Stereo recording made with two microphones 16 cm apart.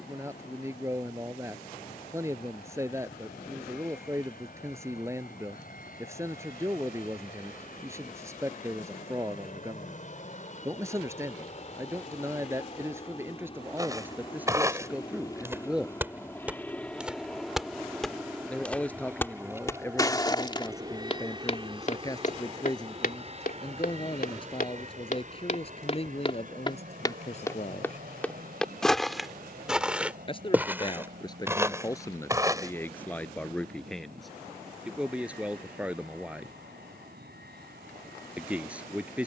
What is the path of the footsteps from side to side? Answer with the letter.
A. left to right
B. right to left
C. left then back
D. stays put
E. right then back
C.